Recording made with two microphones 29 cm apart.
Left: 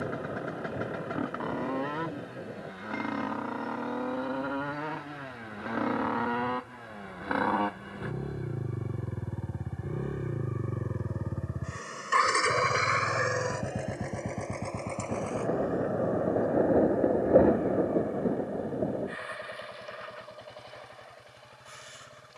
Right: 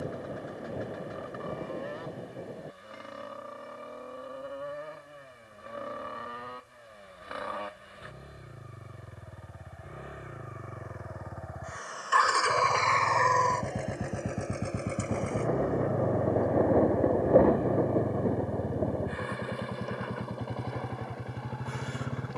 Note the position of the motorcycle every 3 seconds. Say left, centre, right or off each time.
left, left, left, left, centre, right, right, right.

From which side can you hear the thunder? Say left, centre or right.
centre.